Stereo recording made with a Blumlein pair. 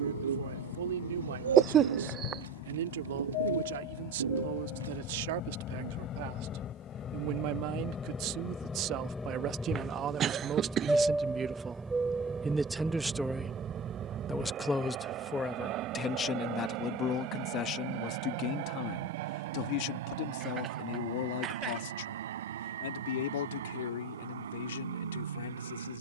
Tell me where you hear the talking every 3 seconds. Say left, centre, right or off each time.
right, right, right, right, centre, left, left, left, left.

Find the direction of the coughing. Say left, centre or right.
right.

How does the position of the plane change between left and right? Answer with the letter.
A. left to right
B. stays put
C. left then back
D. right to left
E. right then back
A.